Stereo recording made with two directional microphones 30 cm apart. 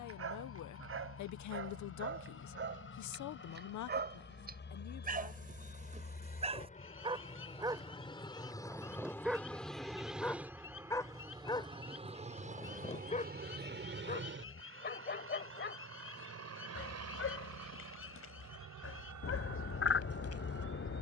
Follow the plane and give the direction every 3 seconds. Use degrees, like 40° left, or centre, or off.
50° left, 40° left, 20° left, 10° right, 30° right, 50° right, 60° right.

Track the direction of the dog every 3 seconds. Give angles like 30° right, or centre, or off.
40° right, 30° right, 10° right, 10° left, 20° left, 40° left, 50° left.